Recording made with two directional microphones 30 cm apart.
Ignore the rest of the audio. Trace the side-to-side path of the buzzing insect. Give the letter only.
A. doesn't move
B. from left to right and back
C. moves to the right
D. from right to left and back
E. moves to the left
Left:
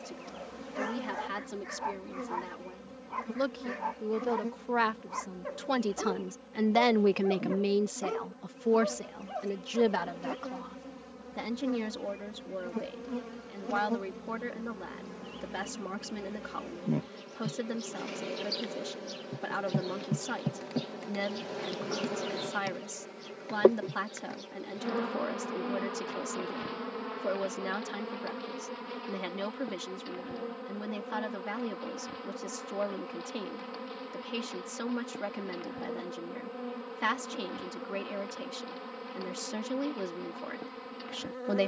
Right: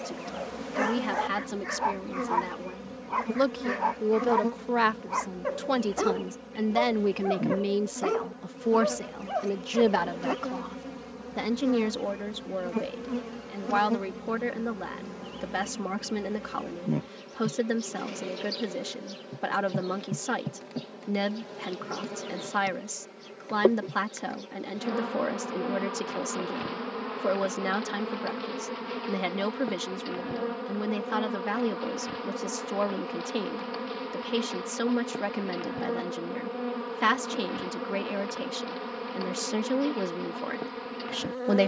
D.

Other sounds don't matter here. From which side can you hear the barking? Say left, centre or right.
right.